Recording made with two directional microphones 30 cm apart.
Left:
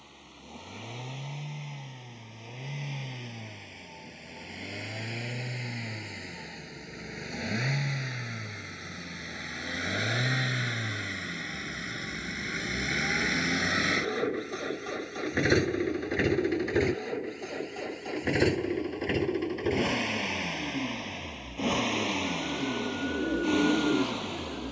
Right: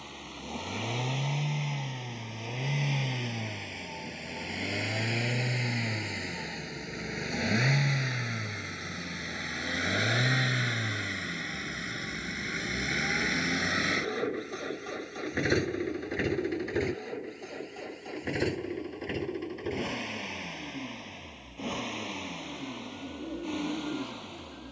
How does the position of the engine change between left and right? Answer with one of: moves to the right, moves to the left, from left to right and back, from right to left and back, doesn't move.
moves to the left.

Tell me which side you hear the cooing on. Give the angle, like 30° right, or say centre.
60° left.